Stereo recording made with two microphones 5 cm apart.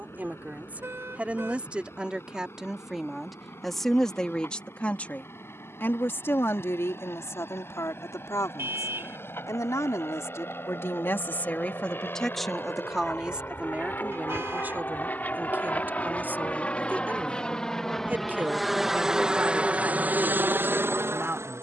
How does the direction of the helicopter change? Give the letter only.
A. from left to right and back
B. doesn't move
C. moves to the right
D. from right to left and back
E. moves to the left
C.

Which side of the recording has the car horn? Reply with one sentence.
You can hear the car horn on the right.